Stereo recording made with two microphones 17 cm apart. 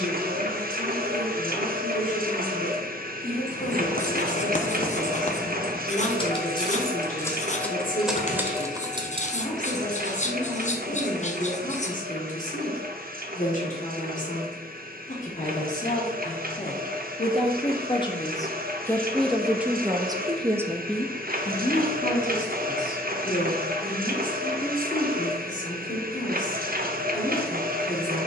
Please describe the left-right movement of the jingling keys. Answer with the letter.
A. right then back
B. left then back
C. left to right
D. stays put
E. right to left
C.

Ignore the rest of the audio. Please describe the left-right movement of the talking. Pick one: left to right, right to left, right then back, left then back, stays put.
right then back.